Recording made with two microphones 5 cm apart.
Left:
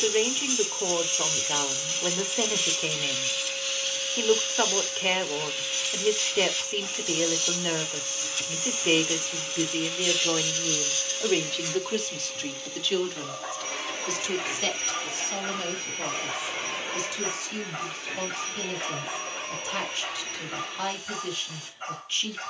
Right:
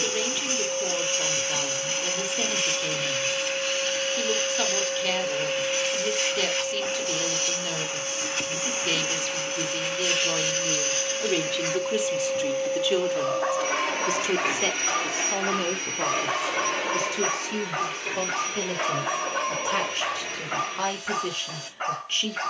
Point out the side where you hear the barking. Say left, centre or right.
right.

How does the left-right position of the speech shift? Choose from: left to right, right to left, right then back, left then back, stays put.
left to right.